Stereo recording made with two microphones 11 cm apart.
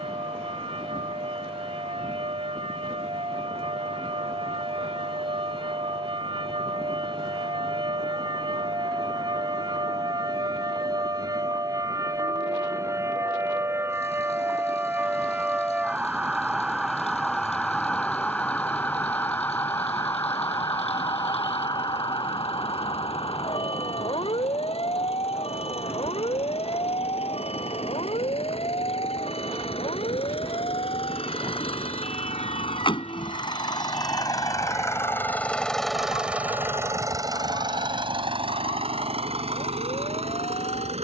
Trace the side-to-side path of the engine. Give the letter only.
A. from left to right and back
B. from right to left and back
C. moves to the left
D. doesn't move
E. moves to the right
E.